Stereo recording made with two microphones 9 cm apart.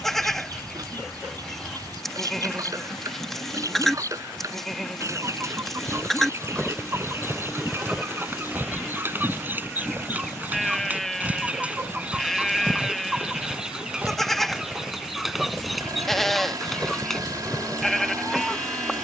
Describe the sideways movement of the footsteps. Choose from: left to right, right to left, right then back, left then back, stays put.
right then back.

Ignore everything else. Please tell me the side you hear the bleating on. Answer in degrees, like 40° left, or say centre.
centre.